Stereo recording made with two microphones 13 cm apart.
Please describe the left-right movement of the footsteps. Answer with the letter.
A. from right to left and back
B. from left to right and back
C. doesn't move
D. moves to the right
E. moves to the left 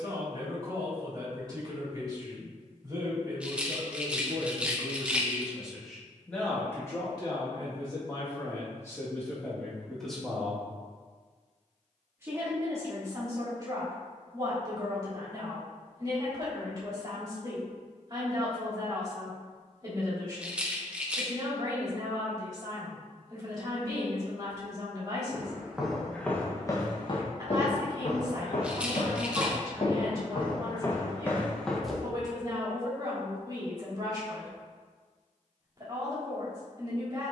A.